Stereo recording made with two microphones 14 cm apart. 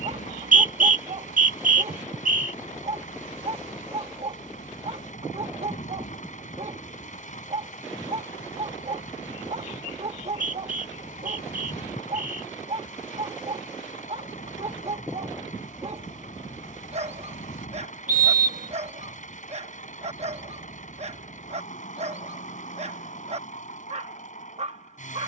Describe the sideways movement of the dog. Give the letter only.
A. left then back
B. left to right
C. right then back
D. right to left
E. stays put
E.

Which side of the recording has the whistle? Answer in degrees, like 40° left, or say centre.
80° right.